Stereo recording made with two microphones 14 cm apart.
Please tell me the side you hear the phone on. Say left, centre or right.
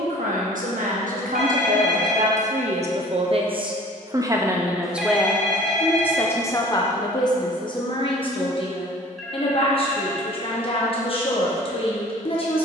centre.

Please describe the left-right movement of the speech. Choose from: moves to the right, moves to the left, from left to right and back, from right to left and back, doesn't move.
moves to the left.